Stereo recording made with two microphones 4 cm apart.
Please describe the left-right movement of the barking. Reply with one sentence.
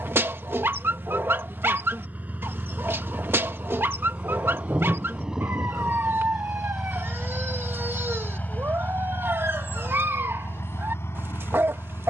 In this clip you hear the barking stay put.